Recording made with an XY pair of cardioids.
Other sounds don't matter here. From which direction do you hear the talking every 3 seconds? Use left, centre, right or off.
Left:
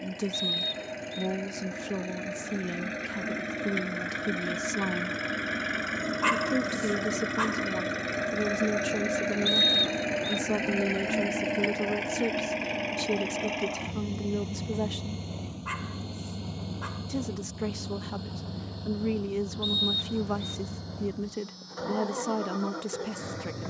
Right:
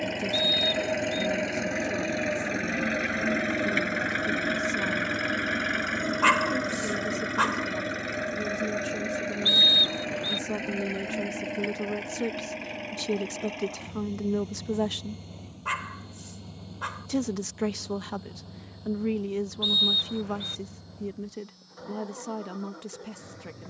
left, left, left, left, centre, right, centre, left.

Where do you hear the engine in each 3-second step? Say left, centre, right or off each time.
right, right, centre, left, left, left, left, left.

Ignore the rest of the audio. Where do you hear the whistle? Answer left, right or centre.
right.